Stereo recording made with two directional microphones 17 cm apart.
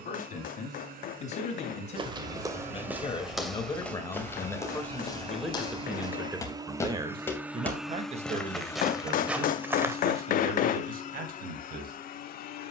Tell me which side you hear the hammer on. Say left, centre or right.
left.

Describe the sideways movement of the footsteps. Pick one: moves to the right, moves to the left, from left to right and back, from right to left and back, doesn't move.
from right to left and back.